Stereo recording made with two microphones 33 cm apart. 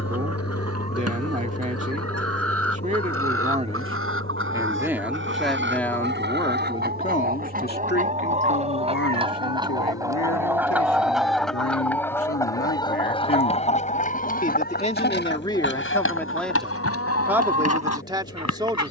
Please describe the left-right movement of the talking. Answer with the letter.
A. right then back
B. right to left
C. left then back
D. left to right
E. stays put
C.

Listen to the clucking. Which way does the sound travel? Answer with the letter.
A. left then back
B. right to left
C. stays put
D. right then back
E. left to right
B.